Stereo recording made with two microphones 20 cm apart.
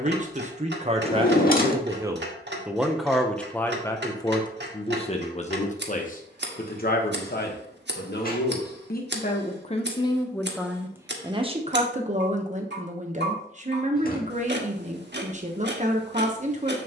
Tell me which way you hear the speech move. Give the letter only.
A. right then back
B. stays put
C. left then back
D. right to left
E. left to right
C.